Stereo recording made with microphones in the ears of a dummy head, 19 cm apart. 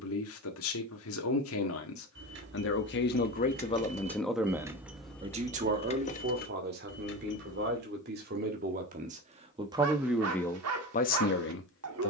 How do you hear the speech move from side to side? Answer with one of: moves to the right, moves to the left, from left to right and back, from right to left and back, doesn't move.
from left to right and back.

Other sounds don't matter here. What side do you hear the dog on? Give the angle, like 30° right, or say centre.
80° right.